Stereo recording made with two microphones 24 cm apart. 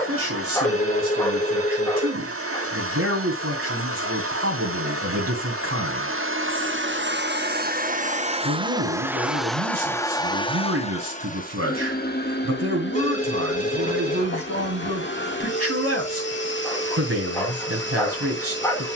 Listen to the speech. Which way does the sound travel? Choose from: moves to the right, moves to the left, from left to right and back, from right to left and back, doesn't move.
doesn't move.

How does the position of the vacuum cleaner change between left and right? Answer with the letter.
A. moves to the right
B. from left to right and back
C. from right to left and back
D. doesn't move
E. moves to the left
E.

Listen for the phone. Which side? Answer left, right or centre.
left.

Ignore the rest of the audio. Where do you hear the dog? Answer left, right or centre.
centre.